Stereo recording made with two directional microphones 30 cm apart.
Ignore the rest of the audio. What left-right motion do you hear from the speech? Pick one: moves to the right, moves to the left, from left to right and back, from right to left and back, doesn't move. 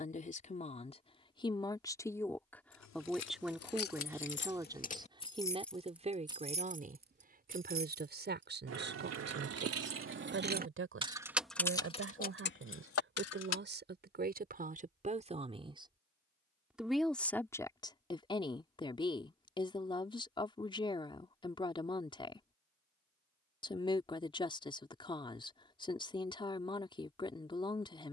from left to right and back.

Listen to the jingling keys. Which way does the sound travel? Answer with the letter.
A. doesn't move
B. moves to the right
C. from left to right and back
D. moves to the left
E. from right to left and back
C.